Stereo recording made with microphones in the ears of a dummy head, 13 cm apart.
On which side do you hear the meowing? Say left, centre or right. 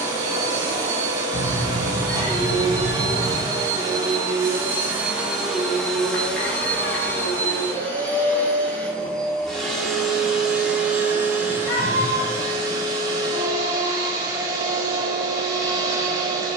left.